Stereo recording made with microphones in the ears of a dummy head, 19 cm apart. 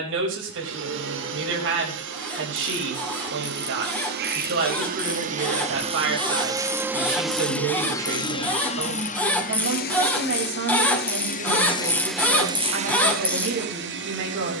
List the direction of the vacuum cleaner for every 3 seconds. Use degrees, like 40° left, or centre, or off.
60° right, 50° right, centre, 40° left, 40° right.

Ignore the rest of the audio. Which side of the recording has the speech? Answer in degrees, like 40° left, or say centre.
70° right.